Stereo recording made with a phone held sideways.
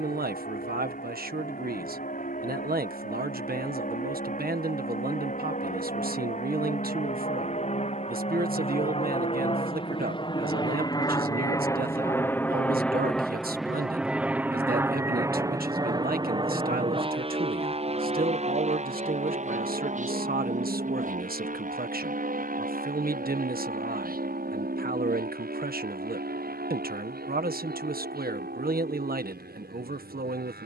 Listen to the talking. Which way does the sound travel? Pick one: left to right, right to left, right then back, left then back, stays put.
stays put.